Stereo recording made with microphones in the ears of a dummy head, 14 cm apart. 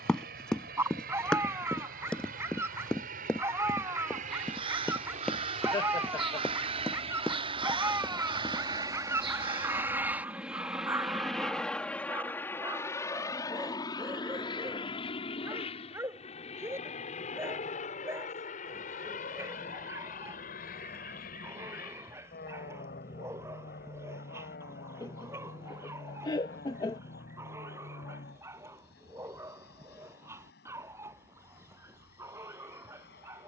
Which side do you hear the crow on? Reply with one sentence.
In this clip you hear the crow on the right.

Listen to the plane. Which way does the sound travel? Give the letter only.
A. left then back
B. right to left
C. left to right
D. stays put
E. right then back
B.